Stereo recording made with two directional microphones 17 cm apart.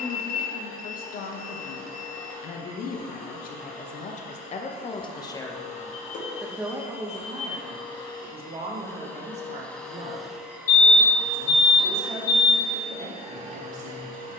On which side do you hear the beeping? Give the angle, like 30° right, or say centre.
50° left.